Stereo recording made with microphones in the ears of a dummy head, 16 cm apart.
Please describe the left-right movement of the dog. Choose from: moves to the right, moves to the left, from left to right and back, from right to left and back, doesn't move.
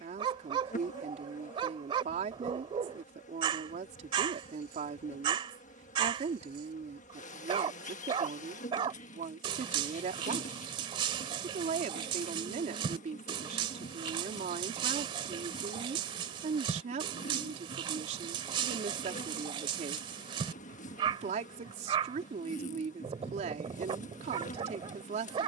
doesn't move.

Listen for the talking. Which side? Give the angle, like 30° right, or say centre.
40° right.